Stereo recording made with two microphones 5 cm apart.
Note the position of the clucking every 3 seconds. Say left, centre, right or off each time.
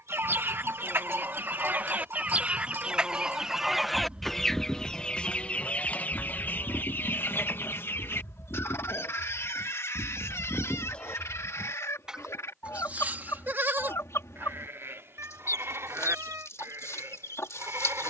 right, centre, left, left, left, left.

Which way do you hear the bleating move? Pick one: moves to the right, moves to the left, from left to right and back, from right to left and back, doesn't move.
from right to left and back.